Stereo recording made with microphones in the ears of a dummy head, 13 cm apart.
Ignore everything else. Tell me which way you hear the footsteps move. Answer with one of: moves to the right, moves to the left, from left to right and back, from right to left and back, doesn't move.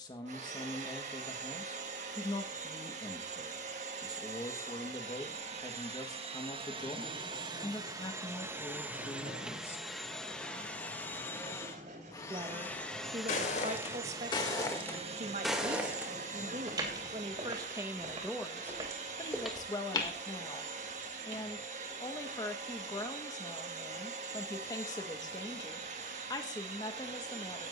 from left to right and back.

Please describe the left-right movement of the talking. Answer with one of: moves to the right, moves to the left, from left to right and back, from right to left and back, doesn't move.
from left to right and back.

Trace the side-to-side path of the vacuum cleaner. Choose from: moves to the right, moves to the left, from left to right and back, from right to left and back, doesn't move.
from right to left and back.